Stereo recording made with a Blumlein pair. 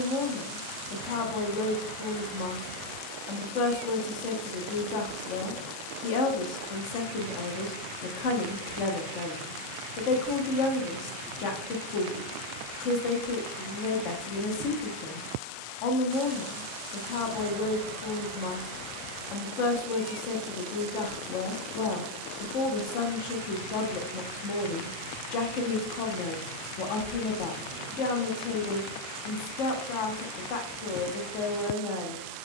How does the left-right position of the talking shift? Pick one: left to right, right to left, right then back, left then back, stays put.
stays put.